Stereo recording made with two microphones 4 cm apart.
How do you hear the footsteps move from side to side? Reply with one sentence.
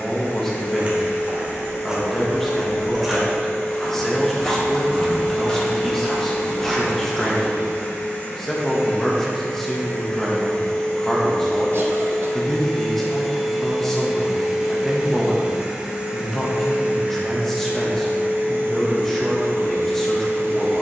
In this clip you hear the footsteps go from the right side to the left.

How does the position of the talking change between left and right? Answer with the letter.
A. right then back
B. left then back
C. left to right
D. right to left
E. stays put
E.